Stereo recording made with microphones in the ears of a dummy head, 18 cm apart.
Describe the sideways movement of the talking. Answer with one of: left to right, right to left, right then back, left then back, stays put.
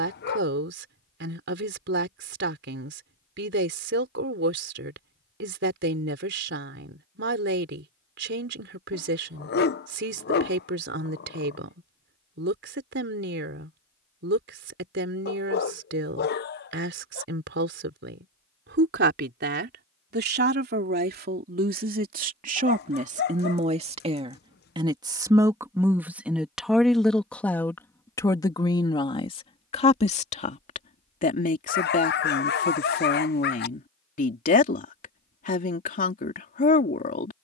right to left.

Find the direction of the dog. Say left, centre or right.
left.